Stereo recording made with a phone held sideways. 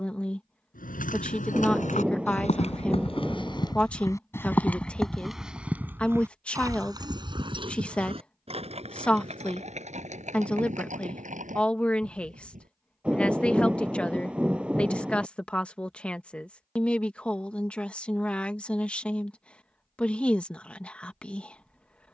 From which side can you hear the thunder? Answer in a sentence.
You can hear the thunder in the centre.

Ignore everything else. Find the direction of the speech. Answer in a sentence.
In this clip you hear the speech in the centre.